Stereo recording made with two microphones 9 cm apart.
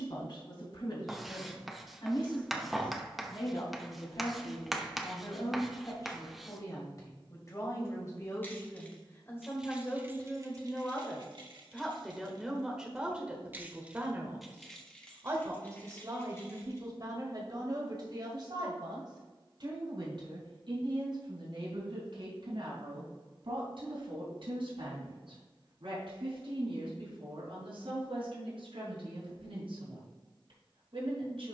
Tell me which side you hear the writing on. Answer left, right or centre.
centre.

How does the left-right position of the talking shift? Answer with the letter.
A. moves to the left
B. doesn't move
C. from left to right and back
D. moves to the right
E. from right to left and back
D.